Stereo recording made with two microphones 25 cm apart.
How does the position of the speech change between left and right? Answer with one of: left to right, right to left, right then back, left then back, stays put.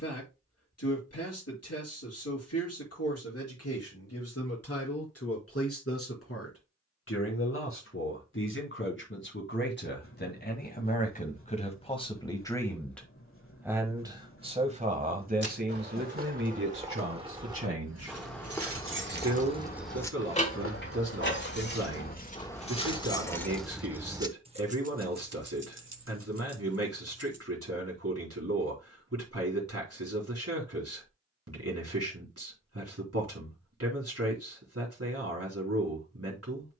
left to right.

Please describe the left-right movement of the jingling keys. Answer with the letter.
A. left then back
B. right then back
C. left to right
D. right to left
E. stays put
A.